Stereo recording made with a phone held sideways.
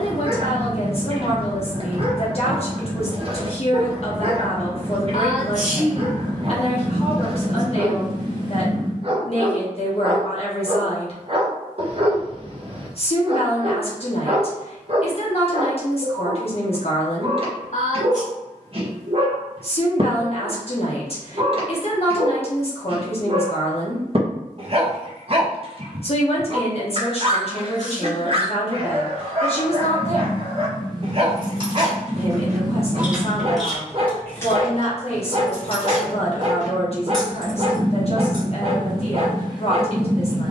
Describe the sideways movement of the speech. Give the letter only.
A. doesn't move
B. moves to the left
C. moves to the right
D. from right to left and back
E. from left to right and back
A.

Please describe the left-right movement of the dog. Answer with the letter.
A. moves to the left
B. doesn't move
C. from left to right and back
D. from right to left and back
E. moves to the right
B.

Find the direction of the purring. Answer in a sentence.
In this clip you hear the purring on the right.